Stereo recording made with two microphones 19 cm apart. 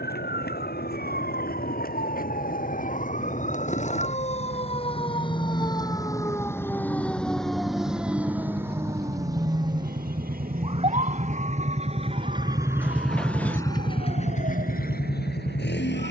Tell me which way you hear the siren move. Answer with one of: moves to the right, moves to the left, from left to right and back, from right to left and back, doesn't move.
moves to the right.